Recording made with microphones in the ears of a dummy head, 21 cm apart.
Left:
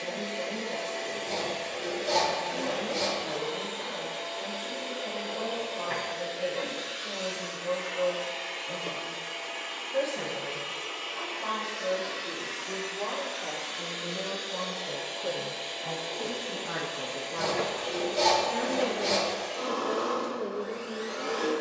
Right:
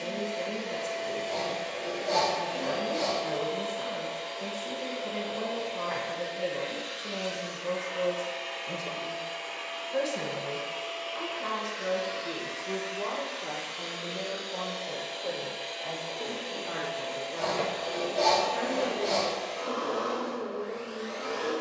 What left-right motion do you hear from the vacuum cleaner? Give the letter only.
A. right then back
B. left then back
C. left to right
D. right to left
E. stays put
E.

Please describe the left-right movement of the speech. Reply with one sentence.
In this clip you hear the speech move from right to left.